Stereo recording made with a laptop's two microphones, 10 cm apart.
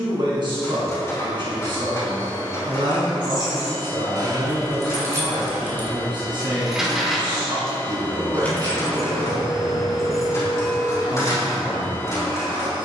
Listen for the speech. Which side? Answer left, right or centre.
right.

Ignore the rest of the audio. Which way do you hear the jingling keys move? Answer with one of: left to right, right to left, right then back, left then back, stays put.
right to left.